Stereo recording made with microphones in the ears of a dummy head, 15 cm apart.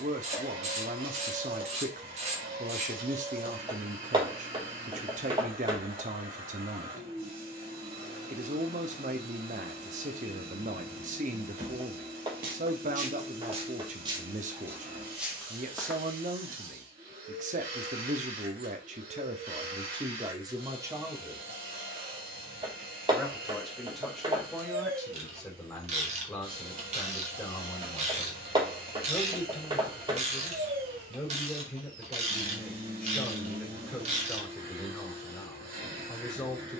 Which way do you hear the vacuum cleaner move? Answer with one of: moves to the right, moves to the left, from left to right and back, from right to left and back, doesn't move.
doesn't move.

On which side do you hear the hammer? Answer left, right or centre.
right.